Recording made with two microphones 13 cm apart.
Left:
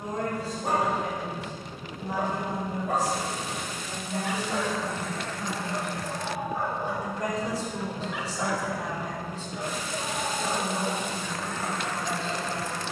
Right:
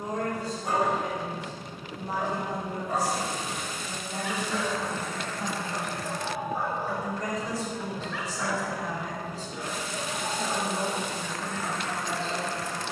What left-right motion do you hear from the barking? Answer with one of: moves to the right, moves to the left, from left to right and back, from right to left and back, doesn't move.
from left to right and back.